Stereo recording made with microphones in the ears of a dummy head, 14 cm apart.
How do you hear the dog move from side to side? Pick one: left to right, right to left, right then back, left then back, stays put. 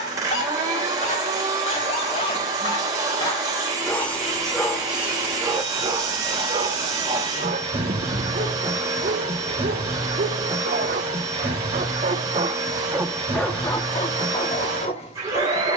right then back.